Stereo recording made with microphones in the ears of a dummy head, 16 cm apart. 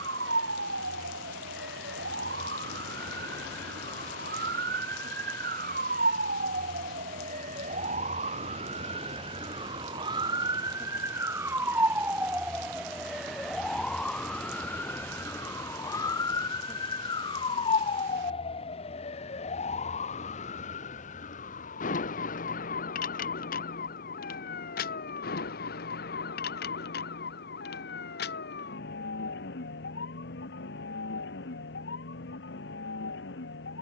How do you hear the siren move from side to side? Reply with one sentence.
You can hear the siren travel towards the left.